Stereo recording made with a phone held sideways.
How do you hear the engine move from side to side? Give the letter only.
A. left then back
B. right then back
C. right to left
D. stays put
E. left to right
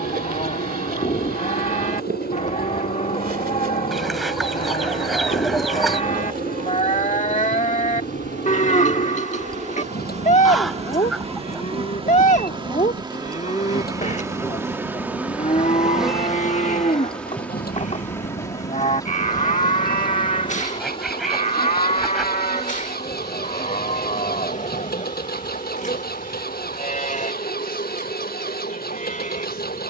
D.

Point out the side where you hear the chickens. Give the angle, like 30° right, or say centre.
centre.